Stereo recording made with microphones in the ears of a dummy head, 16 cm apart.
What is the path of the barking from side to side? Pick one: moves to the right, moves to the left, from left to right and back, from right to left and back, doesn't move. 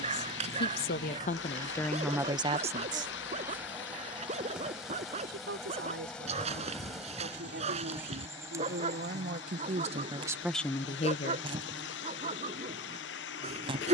doesn't move.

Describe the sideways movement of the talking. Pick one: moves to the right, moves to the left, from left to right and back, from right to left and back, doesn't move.
from left to right and back.